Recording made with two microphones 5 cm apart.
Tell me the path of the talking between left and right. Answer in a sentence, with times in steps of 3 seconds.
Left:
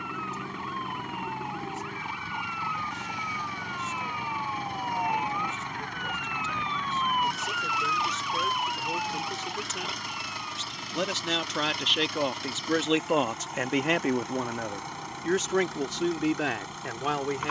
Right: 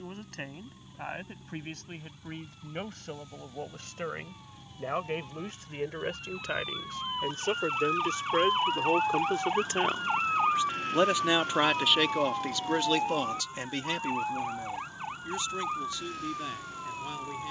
You can hear the talking on the right from 0 s and on the left from 12 s.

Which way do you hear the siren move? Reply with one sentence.
You can hear the siren move from left to right.